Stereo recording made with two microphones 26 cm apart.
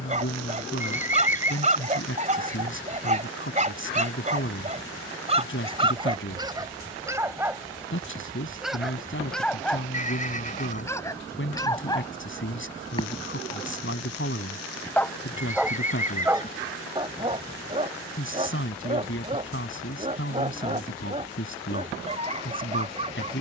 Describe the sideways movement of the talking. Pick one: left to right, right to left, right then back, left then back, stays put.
stays put.